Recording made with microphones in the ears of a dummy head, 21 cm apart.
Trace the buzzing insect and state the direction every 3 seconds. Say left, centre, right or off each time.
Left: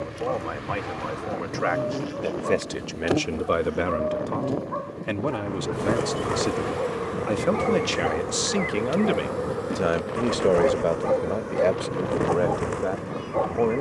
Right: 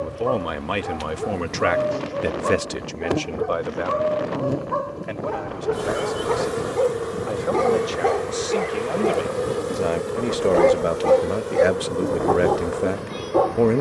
left, centre, right, right, right.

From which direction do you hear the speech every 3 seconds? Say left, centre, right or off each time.
right, left, left, centre, right.